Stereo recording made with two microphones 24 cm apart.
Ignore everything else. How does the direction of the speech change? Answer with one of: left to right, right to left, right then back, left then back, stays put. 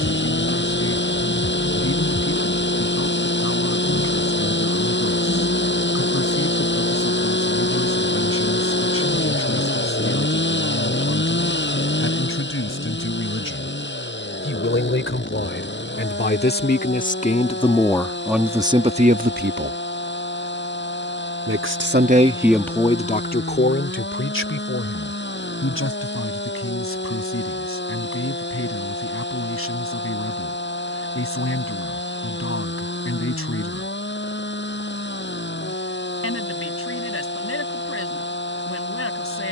right then back.